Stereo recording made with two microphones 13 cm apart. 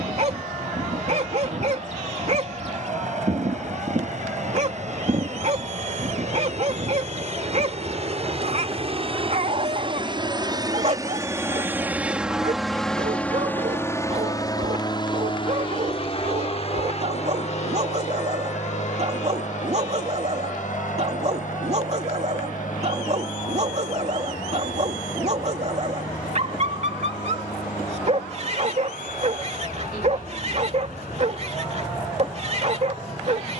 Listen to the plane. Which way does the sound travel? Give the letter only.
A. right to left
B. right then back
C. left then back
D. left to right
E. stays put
A.